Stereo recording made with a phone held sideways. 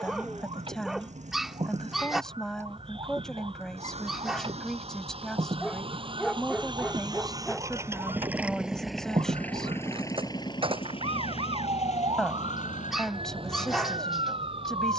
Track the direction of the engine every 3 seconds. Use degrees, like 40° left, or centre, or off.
60° right, 50° right, 20° right, 30° left, 70° left.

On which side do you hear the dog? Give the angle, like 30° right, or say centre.
centre.